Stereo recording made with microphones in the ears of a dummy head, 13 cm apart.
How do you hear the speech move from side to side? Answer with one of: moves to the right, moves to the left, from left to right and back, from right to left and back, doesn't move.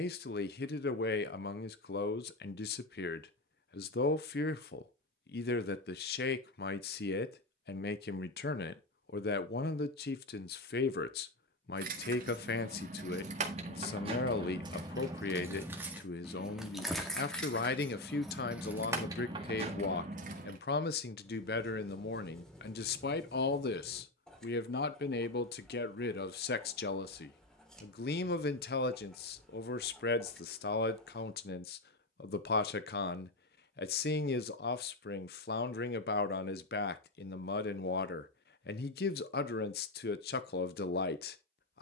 doesn't move.